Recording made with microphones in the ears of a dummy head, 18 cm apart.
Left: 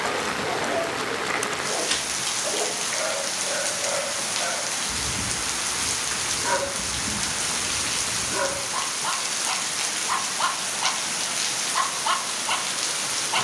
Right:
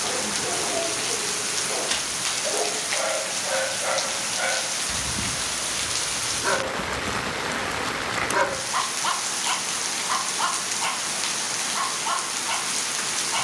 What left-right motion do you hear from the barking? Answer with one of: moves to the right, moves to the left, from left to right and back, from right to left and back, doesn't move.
from left to right and back.